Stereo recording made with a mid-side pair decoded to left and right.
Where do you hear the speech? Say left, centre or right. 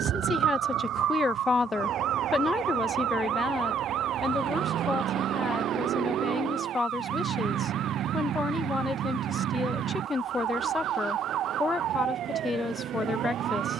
left.